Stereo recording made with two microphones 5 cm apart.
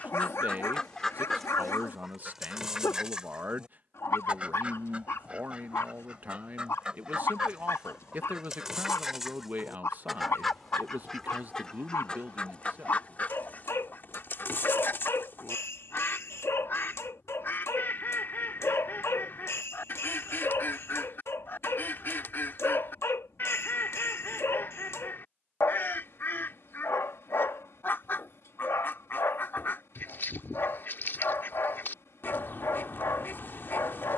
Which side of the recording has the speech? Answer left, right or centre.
right.